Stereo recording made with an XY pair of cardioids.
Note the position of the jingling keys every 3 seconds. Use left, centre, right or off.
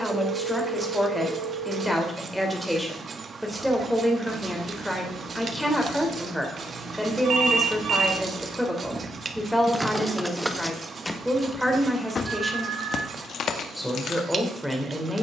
off, right, right, centre, left.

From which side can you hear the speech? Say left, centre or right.
centre.